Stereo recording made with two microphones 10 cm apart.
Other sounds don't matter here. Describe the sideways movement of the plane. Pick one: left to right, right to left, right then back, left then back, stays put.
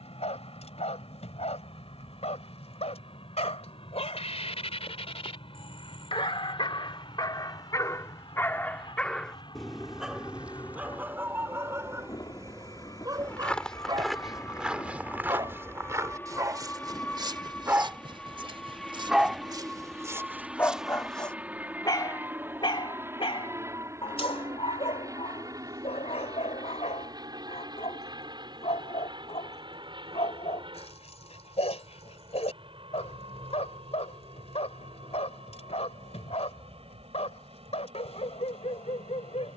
left to right.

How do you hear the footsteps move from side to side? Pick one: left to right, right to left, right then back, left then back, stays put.
right then back.